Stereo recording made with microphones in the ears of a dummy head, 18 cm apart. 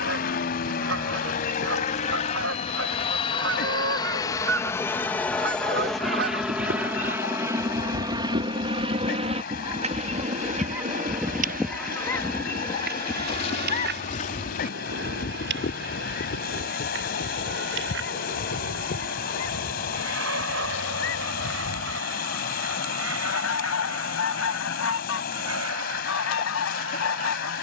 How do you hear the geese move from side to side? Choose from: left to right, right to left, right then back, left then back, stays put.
right to left.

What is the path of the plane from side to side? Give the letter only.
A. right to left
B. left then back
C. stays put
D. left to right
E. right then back
D.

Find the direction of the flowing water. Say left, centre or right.
left.